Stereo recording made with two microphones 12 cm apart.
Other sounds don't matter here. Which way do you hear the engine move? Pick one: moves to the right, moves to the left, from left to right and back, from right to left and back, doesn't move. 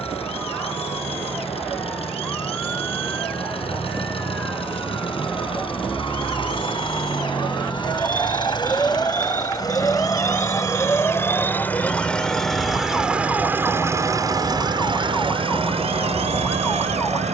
moves to the right.